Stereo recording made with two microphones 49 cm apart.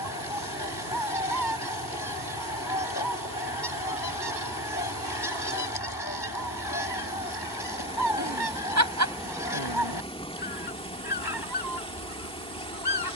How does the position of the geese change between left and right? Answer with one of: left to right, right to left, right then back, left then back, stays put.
stays put.